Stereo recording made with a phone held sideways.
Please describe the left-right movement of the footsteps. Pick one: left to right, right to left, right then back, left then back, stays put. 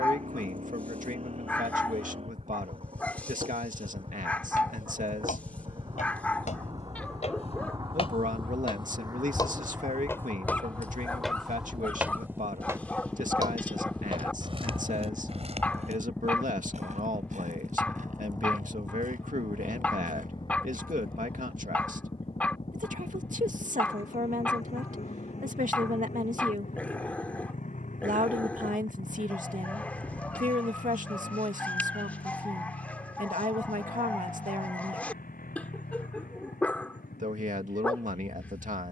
left to right.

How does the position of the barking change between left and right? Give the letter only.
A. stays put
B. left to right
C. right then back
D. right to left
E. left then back
A.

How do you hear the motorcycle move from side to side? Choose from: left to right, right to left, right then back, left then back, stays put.
right to left.